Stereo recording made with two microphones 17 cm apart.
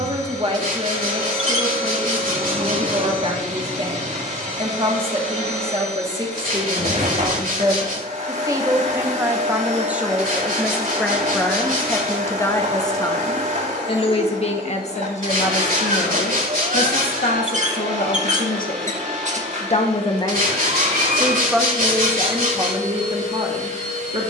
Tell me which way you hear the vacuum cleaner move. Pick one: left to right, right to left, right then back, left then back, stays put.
stays put.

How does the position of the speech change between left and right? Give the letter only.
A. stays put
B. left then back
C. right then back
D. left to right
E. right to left
B.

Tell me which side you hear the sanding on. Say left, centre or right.
right.